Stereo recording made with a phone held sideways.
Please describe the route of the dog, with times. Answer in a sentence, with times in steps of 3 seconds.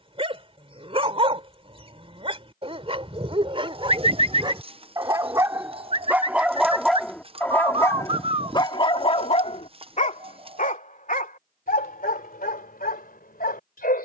In this clip you hear the dog on the right from 0 s, in the centre from 6 s and on the left from 9 s.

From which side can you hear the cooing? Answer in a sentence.
In this clip you hear the cooing on the right.